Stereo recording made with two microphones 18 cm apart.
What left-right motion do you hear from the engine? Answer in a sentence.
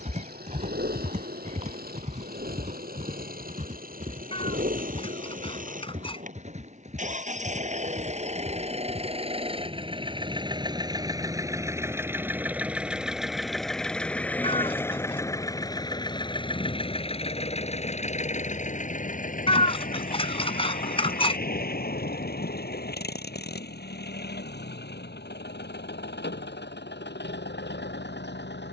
In this clip you hear the engine travel towards the left.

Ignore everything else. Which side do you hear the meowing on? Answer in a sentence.
You can hear the meowing on the left.